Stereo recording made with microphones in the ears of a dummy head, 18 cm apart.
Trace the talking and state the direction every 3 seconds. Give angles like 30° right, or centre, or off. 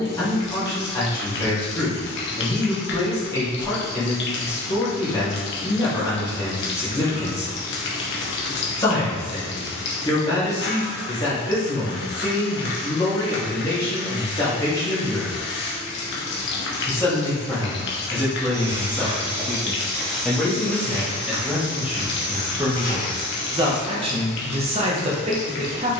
20° left, 20° left, 20° left, 20° left, 20° left, 10° left, 10° left, 10° right, 30° right.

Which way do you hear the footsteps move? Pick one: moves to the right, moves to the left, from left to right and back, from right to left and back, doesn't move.
moves to the left.